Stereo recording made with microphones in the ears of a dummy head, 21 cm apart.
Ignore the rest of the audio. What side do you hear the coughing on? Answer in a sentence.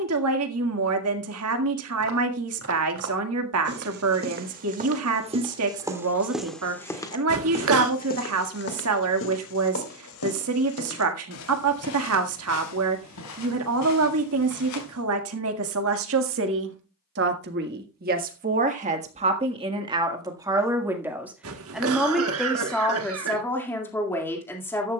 In this clip you hear the coughing on the right.